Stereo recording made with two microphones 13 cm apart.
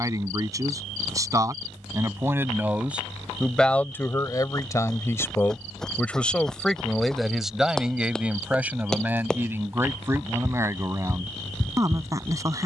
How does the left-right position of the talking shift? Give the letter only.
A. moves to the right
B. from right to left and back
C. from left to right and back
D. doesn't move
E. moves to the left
B.